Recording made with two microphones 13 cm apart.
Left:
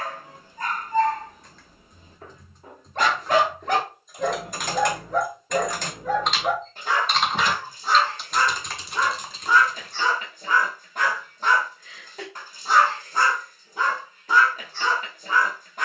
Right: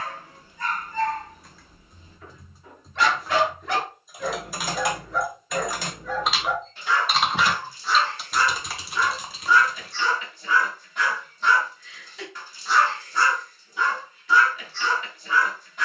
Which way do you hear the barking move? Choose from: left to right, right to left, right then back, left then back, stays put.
stays put.